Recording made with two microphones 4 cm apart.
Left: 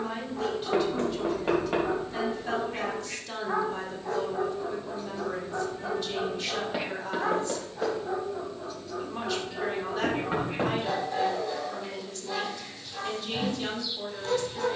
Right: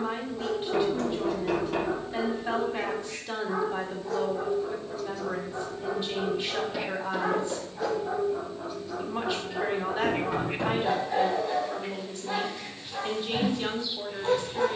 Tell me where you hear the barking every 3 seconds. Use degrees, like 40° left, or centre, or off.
50° left, 30° left, centre, 20° right, 20° right.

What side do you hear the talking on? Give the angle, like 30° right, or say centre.
20° right.